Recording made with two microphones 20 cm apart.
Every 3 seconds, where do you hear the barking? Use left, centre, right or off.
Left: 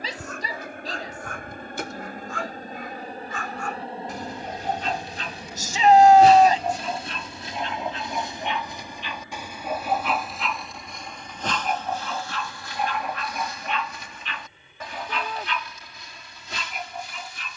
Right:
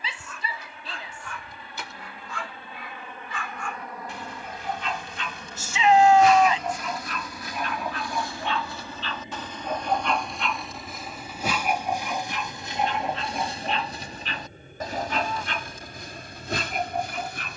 left, left, left, centre, right, right.